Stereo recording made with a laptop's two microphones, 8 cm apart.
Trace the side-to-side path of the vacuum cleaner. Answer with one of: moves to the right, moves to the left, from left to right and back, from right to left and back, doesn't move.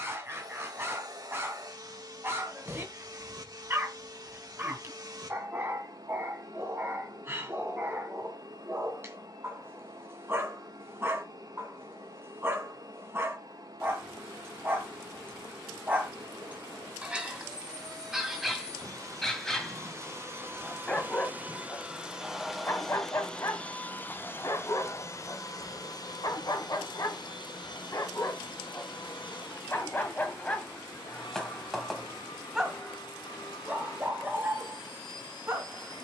moves to the left.